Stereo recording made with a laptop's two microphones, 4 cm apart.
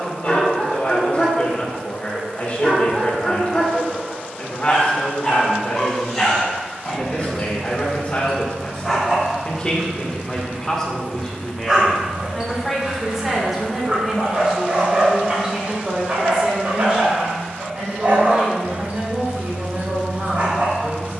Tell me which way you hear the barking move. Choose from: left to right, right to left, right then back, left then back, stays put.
left to right.